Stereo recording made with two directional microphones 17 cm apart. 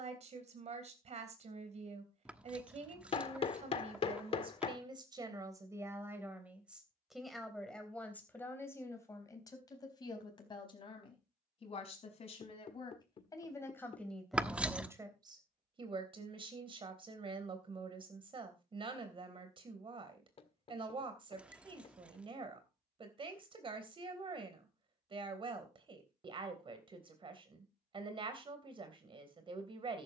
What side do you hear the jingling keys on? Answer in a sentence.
In this clip you hear the jingling keys in the centre.